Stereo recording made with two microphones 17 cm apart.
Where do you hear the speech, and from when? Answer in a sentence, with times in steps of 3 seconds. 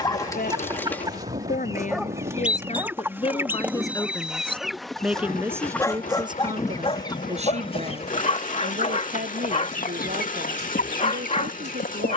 In this clip you hear the speech on the left from 0 s, in the centre from 3 s and on the right from 6 s.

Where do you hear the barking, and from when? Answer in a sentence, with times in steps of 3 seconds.
You can hear the barking in the centre from 0 s and on the left from 6 s.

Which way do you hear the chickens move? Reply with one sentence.
In this clip you hear the chickens go from the right side to the left.